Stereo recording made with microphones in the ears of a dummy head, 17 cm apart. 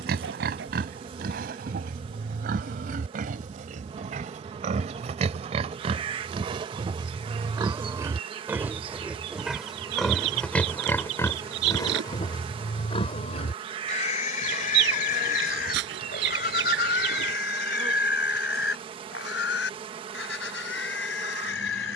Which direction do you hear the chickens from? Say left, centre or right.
right.